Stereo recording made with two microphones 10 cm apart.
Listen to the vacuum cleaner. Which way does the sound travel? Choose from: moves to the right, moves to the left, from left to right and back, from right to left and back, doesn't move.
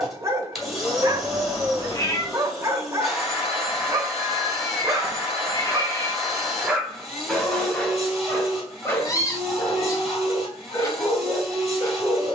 doesn't move.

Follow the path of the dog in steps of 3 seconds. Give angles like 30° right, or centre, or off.
30° right, 20° right, 10° left, 30° left.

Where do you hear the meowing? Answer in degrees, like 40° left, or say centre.
30° left.